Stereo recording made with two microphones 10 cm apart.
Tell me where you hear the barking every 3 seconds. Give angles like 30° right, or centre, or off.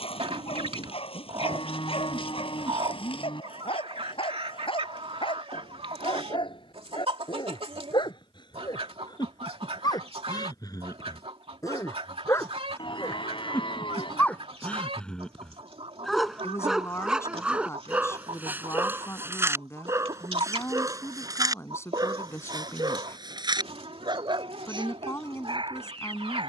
60° left, 60° left, 50° left, 40° left, 20° left, centre, 20° right, 40° right, 50° right.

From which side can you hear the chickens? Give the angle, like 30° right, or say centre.
70° right.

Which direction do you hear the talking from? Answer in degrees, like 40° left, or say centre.
30° left.